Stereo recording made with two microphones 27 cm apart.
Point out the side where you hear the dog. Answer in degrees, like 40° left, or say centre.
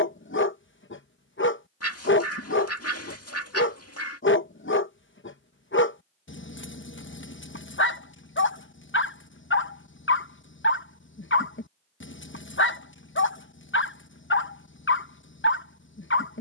50° left.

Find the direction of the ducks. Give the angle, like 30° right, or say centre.
60° left.